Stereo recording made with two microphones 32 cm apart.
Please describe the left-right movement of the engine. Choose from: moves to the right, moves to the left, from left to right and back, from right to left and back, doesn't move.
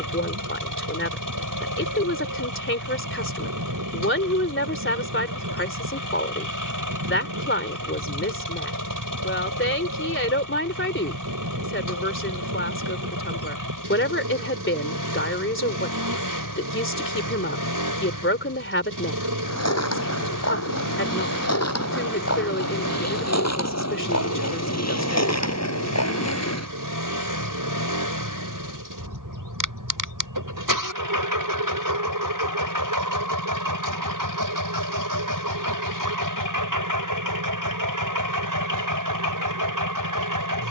doesn't move.